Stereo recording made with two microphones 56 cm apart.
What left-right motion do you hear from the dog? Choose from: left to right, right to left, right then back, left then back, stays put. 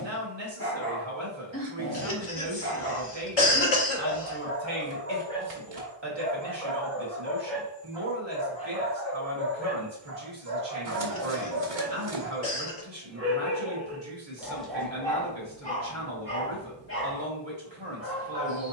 right then back.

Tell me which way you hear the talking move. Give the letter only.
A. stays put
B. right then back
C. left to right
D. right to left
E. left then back
A.